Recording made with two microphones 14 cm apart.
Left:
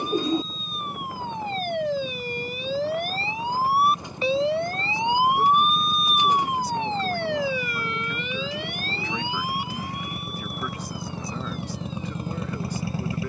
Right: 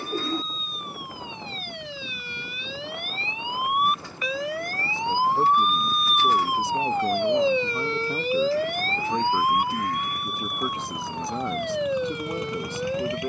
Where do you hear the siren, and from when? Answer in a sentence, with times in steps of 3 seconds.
In this clip you hear the siren on the left from 0 s and on the right from 6 s.